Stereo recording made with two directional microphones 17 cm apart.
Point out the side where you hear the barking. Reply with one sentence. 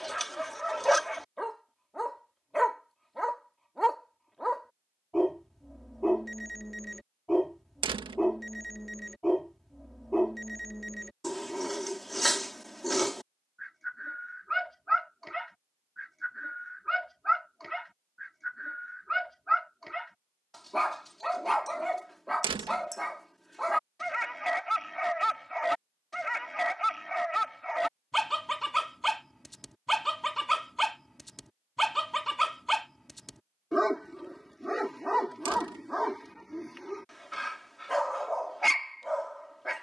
In this clip you hear the barking in the centre.